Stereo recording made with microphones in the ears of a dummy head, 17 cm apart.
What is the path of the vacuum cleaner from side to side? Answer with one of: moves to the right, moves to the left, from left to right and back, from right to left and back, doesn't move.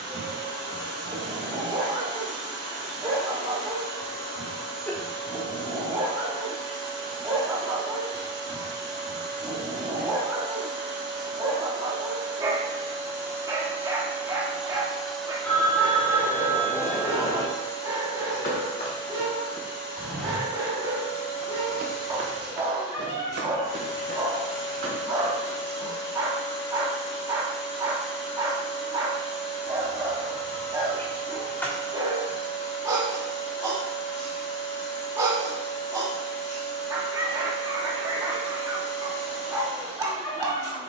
moves to the left.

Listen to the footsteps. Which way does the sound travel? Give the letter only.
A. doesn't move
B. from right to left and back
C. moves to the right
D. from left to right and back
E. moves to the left
C.